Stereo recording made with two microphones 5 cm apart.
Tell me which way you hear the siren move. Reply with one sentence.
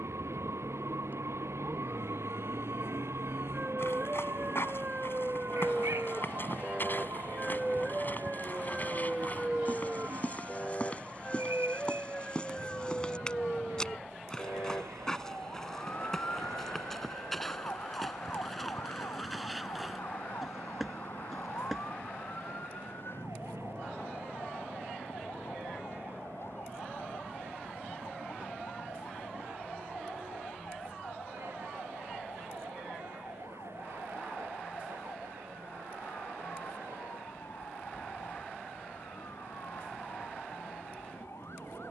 In this clip you hear the siren move from right to left.